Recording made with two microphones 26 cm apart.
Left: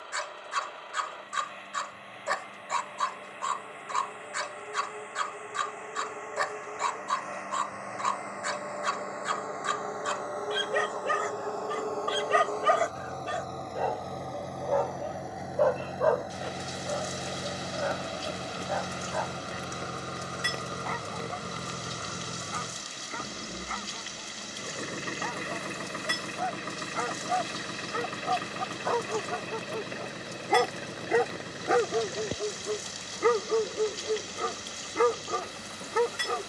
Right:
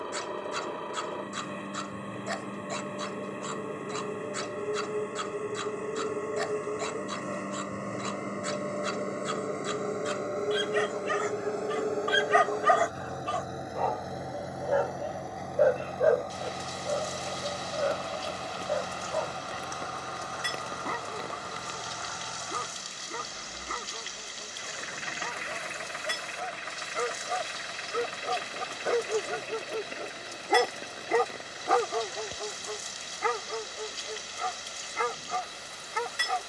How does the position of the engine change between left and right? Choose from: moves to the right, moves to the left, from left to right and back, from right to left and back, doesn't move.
moves to the left.